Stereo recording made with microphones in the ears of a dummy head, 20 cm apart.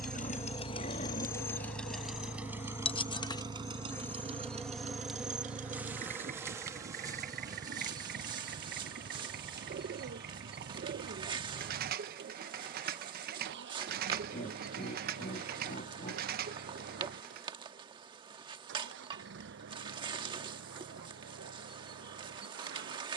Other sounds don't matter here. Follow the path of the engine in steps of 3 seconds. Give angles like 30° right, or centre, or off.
10° left, 30° right, 40° right, 50° right, 50° right, 60° right, 60° right, 60° right.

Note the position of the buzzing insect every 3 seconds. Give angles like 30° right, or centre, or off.
30° left, centre, 20° right, 20° right, 20° right, 20° right, 20° right, 20° right.